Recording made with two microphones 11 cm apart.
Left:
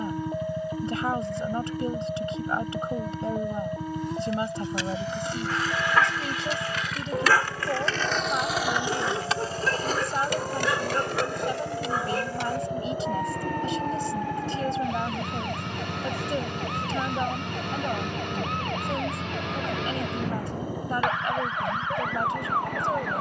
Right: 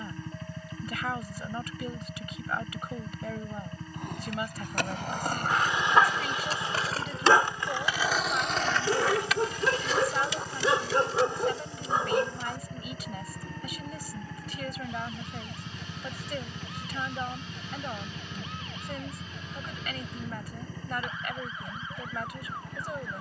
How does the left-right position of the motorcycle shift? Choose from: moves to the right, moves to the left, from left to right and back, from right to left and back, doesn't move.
doesn't move.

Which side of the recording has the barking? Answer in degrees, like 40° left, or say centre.
20° right.